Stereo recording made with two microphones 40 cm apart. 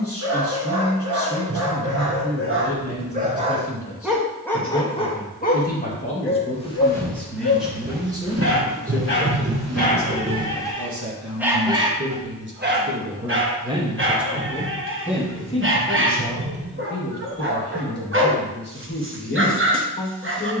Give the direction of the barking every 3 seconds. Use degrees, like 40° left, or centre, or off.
40° right, centre, 40° left, 10° left, 30° right, 30° right, 30° right.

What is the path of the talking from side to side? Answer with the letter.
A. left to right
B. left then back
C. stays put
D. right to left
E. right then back
E.